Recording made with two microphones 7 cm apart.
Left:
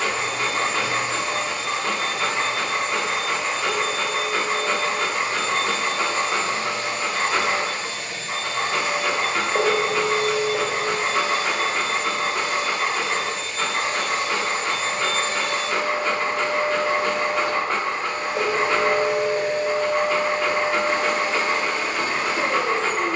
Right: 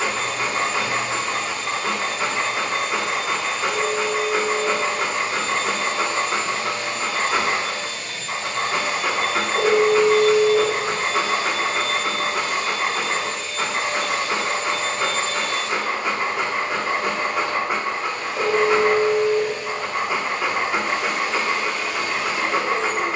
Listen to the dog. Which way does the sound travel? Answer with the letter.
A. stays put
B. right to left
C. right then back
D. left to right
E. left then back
A.